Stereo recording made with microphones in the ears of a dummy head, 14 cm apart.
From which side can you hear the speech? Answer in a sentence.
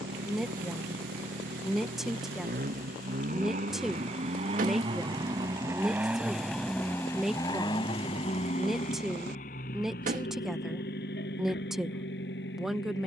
In this clip you hear the speech in the centre.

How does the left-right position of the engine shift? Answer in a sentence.
You can hear the engine travel towards the left.